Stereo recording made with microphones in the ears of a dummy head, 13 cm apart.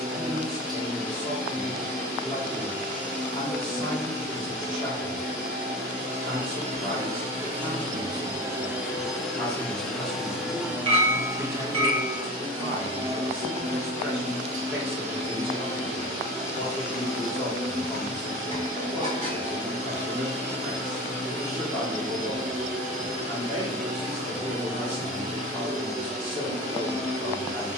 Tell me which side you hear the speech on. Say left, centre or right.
right.